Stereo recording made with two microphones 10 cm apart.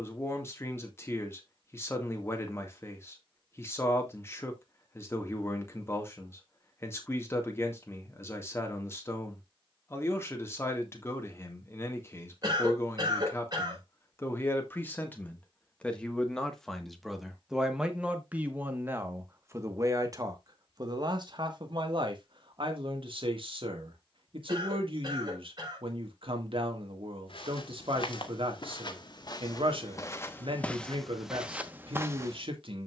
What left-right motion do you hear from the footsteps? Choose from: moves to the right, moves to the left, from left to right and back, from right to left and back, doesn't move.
moves to the right.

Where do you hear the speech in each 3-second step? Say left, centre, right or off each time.
left, left, left, left, left, centre, right, right, right, right, right.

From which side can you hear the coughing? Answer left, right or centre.
right.